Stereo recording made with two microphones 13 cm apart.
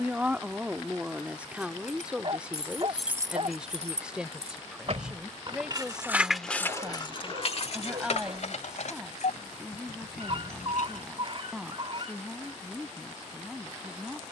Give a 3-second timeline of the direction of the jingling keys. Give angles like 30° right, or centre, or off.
50° left, 40° right, 40° left, 80° left, off.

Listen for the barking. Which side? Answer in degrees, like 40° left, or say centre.
50° right.